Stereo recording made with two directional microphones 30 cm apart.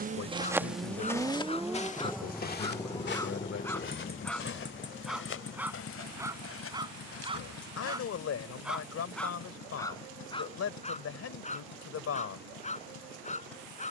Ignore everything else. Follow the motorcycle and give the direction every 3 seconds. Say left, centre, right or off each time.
centre, left, left, left, left.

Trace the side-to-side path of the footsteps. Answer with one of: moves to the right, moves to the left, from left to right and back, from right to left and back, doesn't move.
moves to the left.